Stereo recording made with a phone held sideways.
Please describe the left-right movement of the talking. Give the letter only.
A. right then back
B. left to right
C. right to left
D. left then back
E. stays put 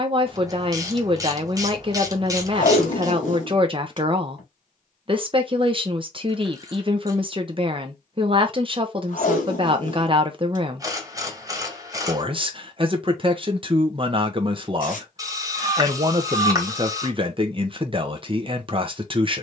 E.